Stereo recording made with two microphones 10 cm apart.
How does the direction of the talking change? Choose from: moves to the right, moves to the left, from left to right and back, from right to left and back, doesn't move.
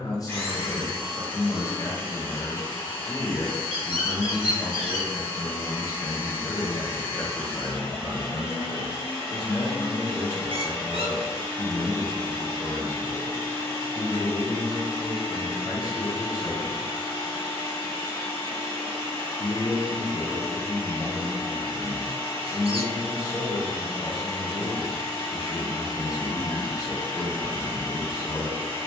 doesn't move.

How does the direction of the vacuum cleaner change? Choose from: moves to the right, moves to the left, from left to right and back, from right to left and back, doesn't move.
doesn't move.